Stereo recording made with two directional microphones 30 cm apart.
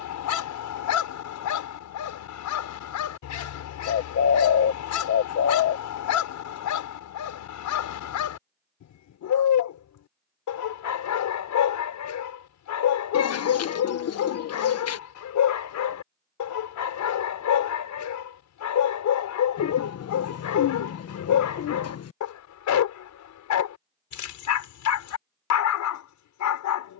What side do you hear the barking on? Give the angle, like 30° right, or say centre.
70° left.